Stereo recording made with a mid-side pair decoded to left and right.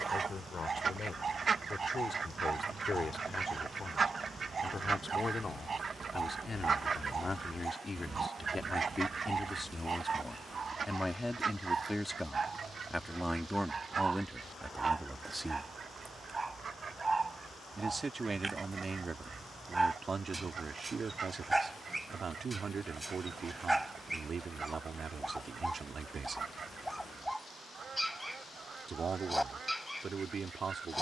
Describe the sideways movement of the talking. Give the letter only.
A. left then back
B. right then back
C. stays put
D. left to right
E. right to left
D.